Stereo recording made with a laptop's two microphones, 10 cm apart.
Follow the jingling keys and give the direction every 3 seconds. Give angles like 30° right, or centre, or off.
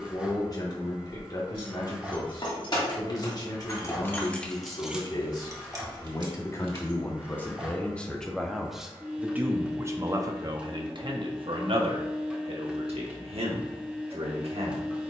50° left, centre, 50° right, off, off.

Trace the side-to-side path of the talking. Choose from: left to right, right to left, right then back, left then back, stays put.
left to right.